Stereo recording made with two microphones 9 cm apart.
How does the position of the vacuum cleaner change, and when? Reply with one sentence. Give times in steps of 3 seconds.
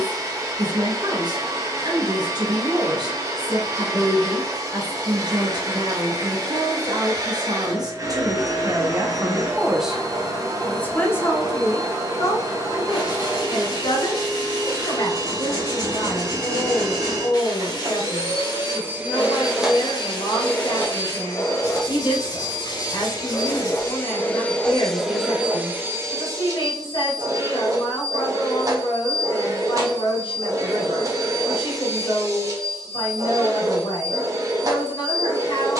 In this clip you hear the vacuum cleaner on the right from 0 s, in the centre from 18 s, on the left from 21 s, in the centre from 24 s and on the right from 27 s.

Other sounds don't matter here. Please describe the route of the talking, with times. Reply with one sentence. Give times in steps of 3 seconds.
In this clip you hear the talking on the right from 0 s, in the centre from 9 s and on the left from 12 s.